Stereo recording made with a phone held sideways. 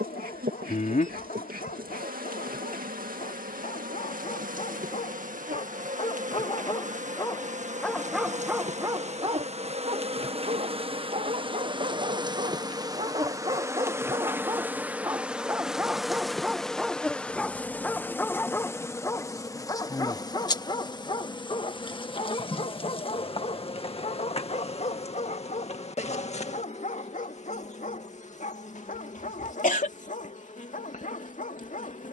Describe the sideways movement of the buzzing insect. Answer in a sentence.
You can hear the buzzing insect go from the right side to the left.